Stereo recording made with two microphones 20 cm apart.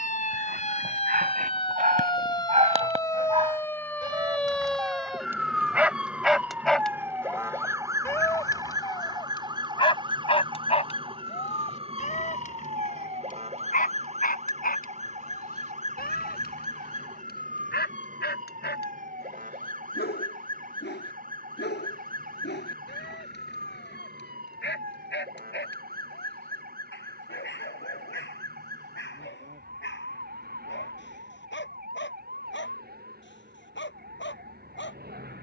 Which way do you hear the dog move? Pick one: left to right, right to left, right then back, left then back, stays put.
right to left.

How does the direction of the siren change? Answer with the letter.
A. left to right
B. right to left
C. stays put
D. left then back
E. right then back
A.